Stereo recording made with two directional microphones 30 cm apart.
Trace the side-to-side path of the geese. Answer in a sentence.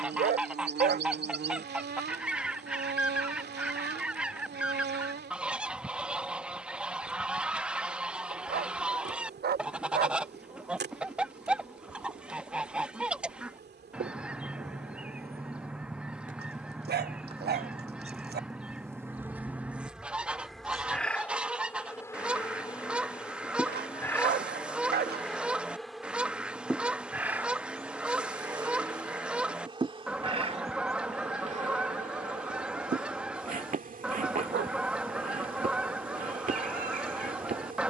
You can hear the geese stay in one place.